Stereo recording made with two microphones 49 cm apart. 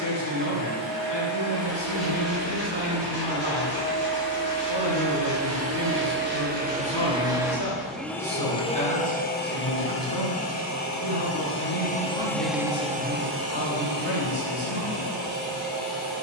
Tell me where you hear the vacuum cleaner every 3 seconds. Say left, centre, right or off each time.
right, right, centre, left, right, right.